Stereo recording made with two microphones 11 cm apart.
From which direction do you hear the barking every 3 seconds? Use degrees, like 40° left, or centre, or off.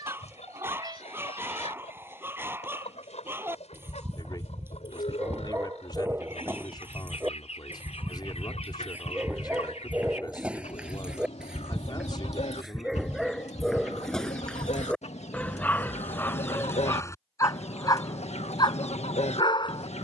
20° right, 20° right, 20° right, 10° right, centre, 20° left, 40° left.